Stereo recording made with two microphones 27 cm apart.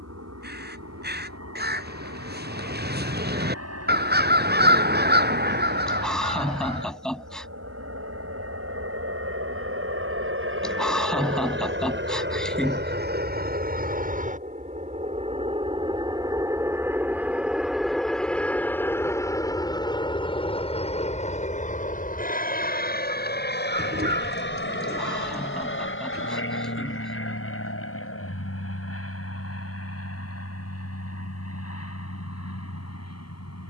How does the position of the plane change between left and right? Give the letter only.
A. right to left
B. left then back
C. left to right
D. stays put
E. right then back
A.